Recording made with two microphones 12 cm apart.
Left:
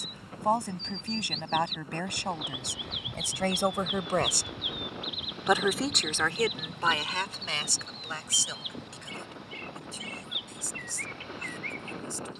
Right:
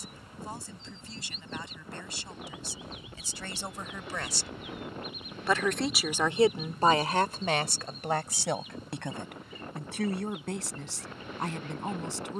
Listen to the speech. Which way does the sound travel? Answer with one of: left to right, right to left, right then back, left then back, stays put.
left to right.